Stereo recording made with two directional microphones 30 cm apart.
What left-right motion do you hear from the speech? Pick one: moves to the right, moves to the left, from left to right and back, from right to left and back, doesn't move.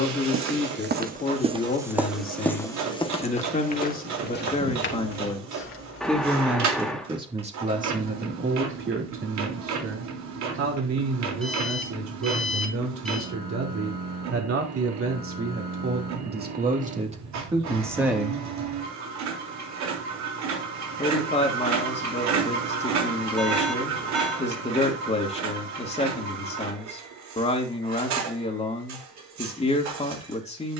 from left to right and back.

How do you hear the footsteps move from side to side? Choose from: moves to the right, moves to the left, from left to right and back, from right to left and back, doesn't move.
moves to the left.